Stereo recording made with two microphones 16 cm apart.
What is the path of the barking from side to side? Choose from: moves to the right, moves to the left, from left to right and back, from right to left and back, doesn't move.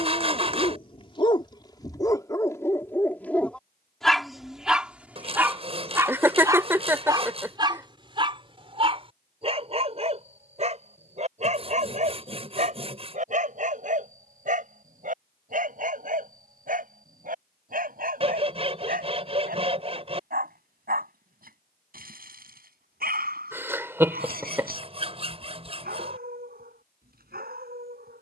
moves to the right.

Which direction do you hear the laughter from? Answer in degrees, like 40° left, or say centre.
10° right.